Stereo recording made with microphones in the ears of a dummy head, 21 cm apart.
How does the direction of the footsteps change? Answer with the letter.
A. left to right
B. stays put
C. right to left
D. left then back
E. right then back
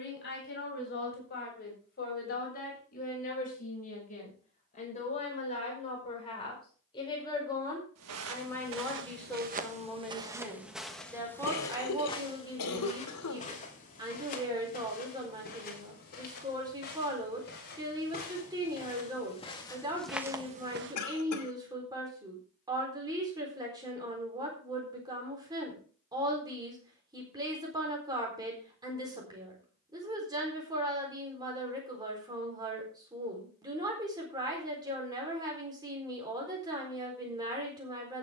D.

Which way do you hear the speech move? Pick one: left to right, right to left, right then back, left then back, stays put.
left to right.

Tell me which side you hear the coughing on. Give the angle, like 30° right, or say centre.
70° left.